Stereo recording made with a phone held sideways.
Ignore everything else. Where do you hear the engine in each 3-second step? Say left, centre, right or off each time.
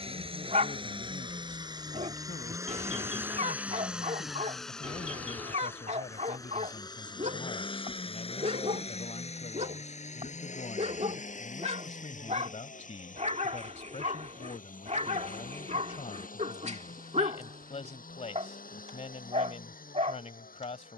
right, centre, left, left, left, left, left.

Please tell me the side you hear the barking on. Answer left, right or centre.
right.